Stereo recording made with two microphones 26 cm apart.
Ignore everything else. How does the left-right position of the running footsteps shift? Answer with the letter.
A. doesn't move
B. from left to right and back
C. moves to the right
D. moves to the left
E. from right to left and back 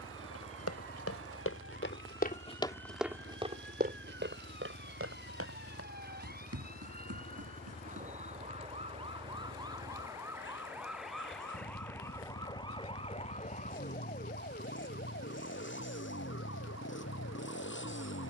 C.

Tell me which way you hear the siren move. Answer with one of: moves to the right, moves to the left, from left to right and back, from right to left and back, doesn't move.
moves to the left.